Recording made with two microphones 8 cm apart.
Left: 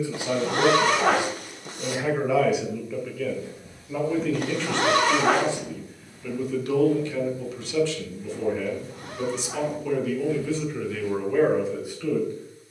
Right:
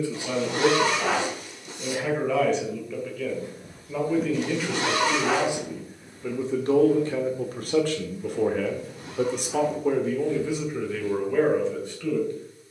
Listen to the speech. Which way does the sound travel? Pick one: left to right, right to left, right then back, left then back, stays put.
right then back.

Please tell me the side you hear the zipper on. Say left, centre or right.
left.